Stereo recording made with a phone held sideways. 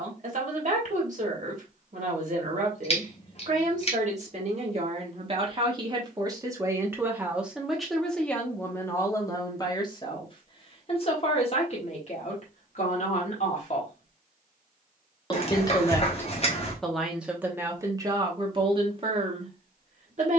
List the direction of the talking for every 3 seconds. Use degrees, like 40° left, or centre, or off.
50° right, 40° right, centre, 30° left, 50° left, centre, 40° right.